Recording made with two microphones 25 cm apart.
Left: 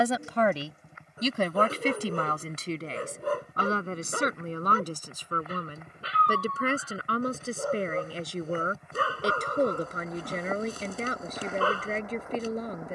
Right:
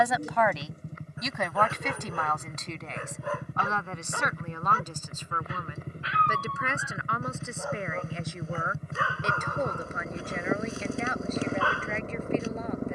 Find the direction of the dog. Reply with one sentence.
In this clip you hear the dog on the left.